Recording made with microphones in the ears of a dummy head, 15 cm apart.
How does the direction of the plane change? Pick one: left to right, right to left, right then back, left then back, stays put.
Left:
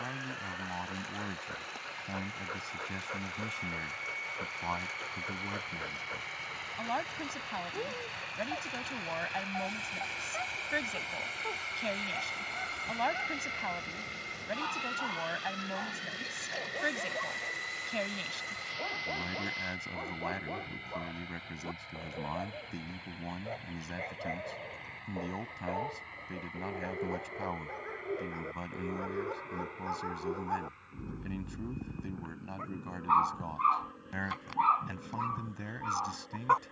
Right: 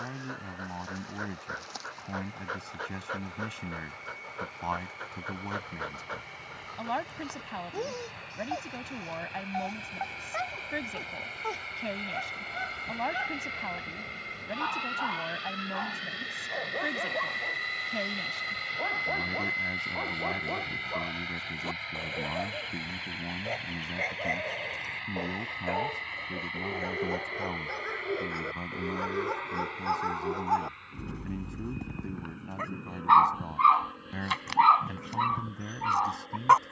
left to right.